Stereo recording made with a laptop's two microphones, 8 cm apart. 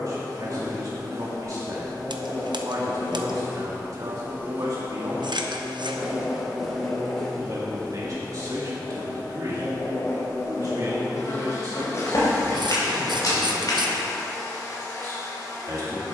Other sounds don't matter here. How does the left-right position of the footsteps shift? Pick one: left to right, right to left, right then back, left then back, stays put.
right to left.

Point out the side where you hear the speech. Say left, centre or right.
right.